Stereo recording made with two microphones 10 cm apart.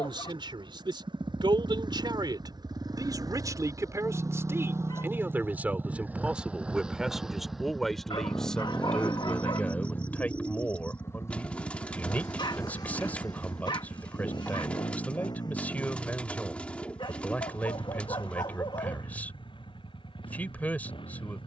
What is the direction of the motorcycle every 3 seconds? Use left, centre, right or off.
right, right, centre, left, left, left, left.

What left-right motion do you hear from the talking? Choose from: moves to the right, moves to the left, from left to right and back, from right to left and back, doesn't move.
moves to the left.